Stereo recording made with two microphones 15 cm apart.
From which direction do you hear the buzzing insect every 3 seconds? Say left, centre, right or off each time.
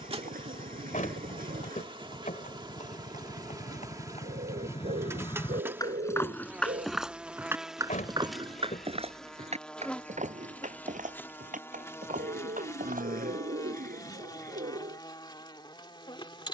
right, right, centre, centre, left, left.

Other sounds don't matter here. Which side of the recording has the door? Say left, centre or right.
left.